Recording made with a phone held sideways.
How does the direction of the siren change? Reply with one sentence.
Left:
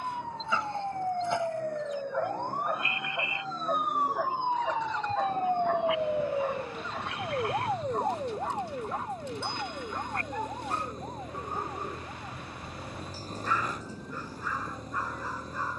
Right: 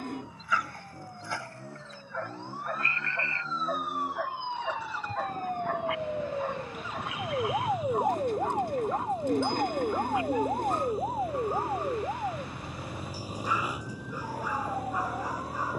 In this clip you hear the siren travel towards the right.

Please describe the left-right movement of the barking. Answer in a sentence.
You can hear the barking travel towards the right.